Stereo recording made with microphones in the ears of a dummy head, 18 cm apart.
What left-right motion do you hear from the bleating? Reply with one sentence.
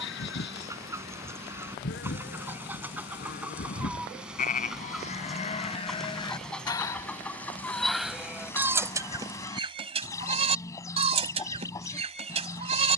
In this clip you hear the bleating travel towards the right.